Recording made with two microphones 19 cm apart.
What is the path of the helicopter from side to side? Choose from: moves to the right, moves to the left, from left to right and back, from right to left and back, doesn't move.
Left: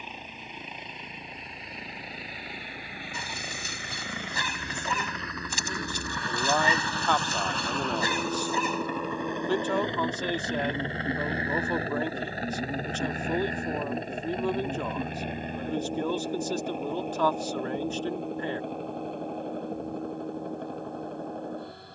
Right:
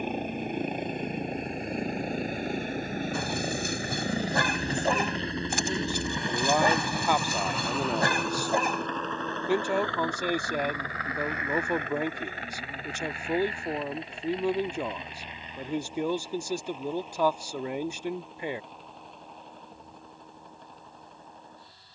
moves to the left.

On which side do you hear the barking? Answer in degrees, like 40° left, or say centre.
70° right.